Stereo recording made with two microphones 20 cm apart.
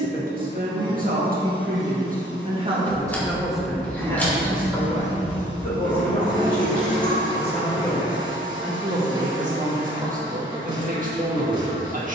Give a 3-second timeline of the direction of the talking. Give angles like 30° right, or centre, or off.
40° right, 10° left, 20° left, 40° right.